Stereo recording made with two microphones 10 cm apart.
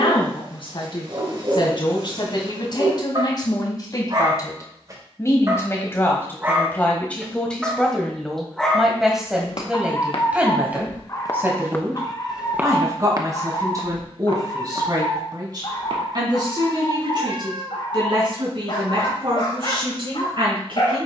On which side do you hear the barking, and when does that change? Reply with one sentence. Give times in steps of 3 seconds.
In this clip you hear the barking on the right from 0 s, in the centre from 6 s and on the left from 9 s.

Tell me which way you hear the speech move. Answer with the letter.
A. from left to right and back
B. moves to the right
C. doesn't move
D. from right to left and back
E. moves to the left
B.